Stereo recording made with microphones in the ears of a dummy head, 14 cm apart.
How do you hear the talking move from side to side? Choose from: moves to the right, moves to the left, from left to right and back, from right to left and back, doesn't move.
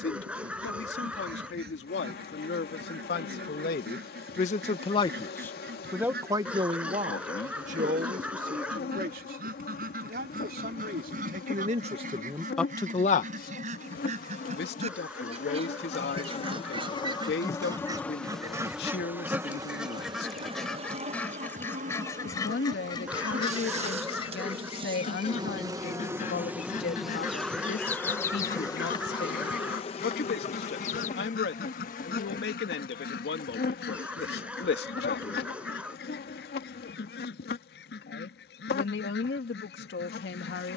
from left to right and back.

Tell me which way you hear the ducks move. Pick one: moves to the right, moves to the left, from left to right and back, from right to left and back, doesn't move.
moves to the left.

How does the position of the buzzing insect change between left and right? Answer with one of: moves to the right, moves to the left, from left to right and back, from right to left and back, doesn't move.
from left to right and back.